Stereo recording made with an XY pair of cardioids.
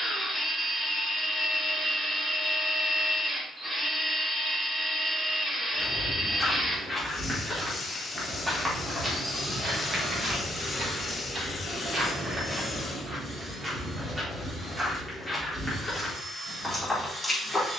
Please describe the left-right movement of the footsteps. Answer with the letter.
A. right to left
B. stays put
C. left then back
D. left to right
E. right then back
E.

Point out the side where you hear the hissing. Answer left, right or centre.
left.